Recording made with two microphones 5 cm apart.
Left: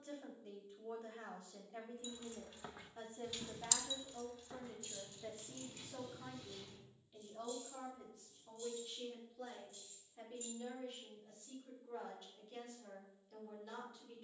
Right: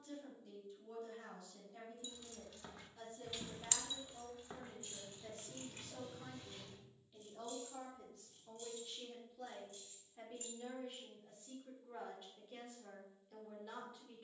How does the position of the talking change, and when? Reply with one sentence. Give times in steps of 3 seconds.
You can hear the talking on the left from 0 s and in the centre from 6 s.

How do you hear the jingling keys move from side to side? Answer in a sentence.
You can hear the jingling keys travel towards the right.